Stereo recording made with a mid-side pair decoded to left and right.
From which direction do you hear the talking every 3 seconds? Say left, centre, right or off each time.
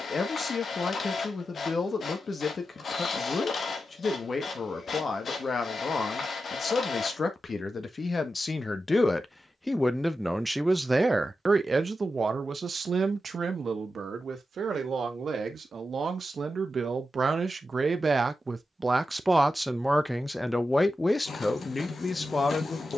left, left, left, centre, right, right, centre, left.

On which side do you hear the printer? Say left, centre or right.
left.